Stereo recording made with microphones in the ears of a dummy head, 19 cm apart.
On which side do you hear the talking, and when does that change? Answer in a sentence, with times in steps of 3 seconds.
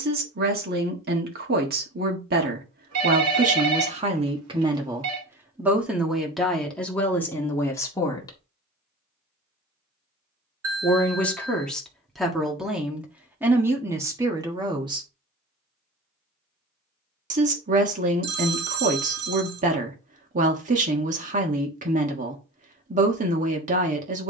You can hear the talking on the right from 0 s, in the centre from 6 s and on the right from 15 s.